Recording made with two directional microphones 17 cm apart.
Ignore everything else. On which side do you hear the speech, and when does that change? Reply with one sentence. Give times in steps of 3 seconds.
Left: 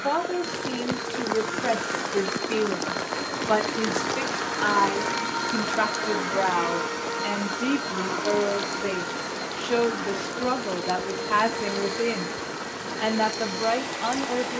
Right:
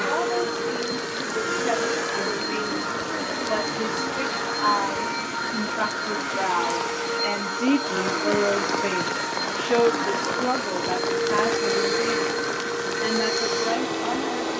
In this clip you hear the speech on the left from 0 s, in the centre from 6 s and on the left from 12 s.